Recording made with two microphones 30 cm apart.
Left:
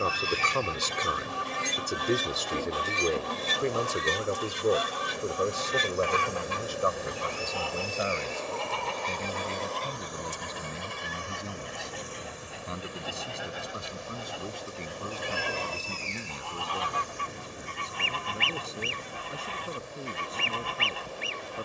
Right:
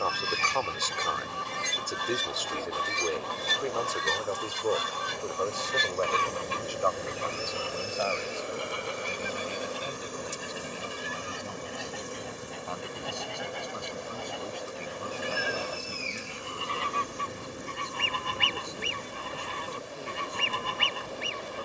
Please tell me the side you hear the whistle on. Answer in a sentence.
In this clip you hear the whistle on the right.